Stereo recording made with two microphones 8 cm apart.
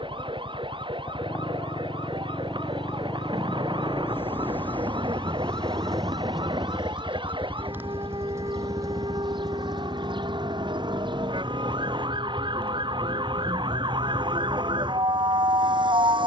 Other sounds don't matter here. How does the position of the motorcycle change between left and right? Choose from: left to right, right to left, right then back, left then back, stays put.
left to right.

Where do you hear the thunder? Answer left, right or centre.
right.